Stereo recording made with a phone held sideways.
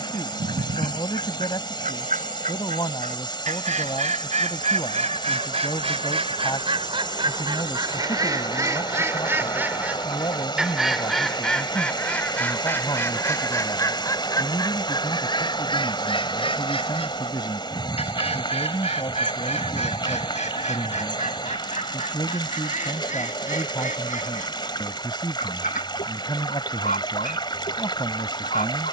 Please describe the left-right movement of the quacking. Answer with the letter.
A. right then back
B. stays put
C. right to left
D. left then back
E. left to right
C.